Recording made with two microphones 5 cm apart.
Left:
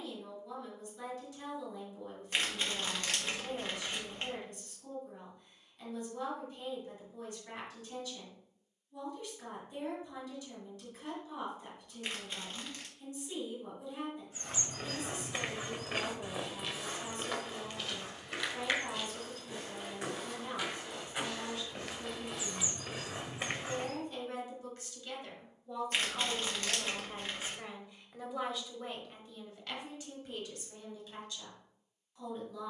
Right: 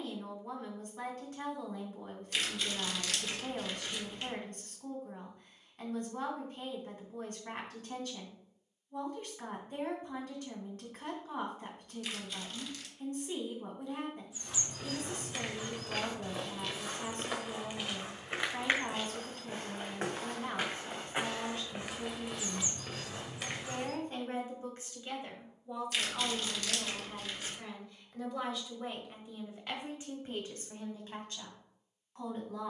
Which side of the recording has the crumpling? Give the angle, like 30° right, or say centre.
30° left.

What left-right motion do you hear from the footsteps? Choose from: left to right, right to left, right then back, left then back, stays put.
right then back.